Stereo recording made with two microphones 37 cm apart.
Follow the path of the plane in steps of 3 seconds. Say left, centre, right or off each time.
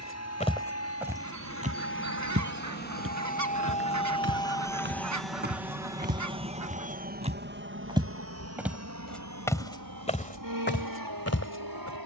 left, centre, right, right.